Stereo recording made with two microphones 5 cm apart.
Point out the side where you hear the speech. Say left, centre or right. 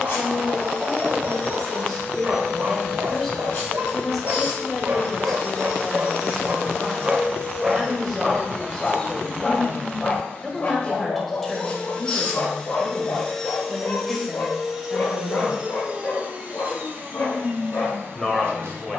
centre.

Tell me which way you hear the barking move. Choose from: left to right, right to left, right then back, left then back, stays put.
right to left.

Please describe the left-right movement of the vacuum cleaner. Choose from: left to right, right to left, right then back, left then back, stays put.
left to right.